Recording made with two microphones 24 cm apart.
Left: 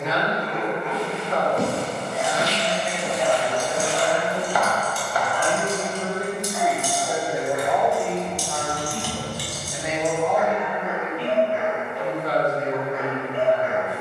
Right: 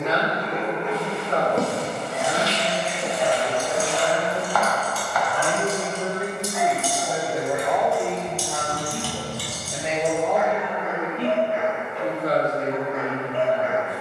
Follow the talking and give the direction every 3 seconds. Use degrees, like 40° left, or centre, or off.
50° right, 30° right, centre, 40° right, 40° right.